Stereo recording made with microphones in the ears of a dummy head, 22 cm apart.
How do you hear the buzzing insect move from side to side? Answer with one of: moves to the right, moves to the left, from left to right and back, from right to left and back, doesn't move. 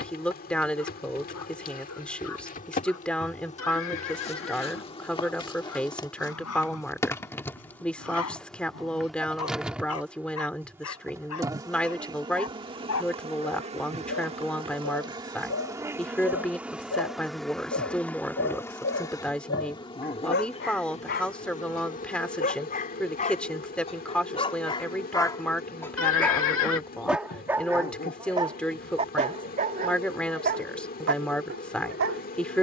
from left to right and back.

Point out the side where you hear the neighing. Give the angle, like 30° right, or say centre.
60° left.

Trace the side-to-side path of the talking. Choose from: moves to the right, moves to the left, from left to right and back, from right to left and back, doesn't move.
doesn't move.